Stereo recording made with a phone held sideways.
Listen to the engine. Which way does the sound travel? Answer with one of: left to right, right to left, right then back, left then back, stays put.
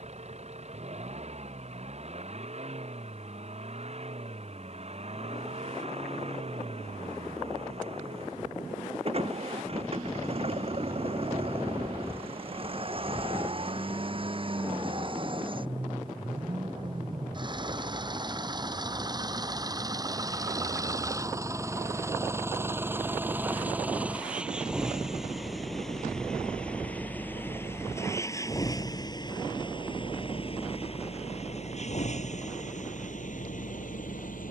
right to left.